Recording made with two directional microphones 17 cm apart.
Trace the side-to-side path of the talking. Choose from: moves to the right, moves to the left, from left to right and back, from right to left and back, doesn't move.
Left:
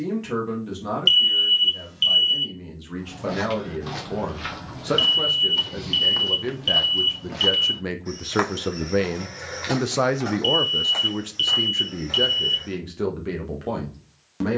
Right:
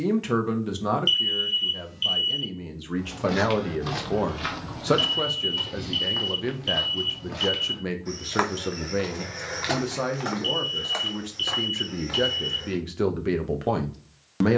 from right to left and back.